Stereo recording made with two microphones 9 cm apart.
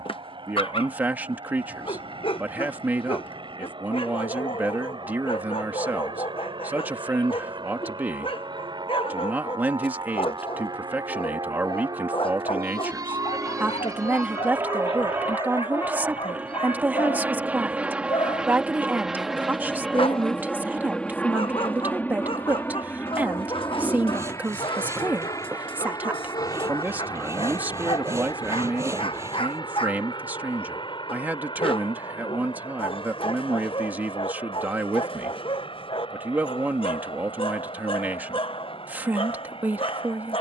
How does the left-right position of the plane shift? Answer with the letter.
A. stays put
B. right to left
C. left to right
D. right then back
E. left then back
B.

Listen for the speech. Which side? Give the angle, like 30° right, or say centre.
20° right.